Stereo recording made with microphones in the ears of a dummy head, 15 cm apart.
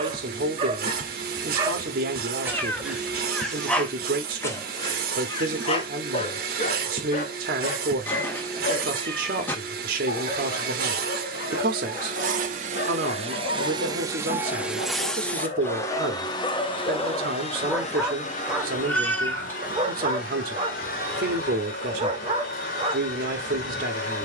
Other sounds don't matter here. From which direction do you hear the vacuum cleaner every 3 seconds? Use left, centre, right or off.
right, right, right, right, right, left, left, left.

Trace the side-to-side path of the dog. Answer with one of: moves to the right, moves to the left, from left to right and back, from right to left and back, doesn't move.
from right to left and back.